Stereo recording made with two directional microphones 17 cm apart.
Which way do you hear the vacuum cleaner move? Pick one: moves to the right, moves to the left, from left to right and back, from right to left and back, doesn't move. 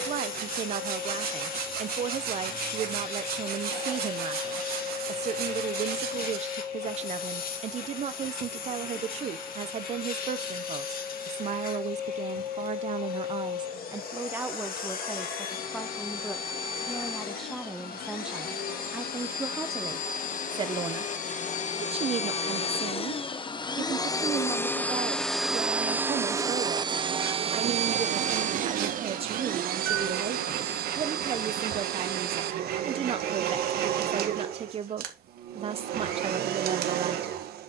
moves to the right.